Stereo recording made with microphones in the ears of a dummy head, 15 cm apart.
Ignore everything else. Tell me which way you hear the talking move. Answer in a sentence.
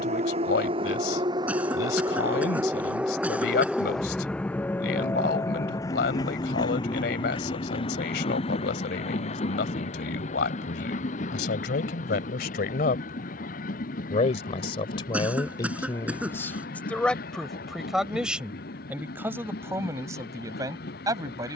You can hear the talking go from the left side to the right.